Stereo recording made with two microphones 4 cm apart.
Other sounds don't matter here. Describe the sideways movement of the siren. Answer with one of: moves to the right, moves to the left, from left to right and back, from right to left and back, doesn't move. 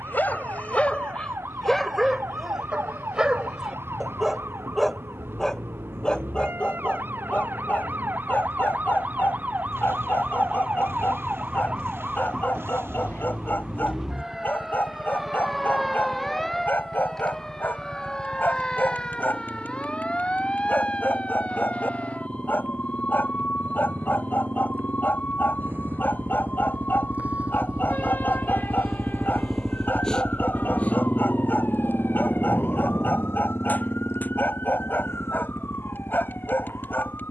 moves to the left.